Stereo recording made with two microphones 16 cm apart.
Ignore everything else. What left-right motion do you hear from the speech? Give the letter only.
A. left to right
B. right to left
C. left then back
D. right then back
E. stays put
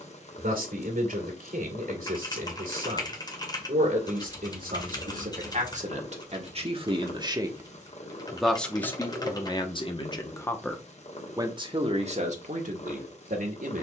C.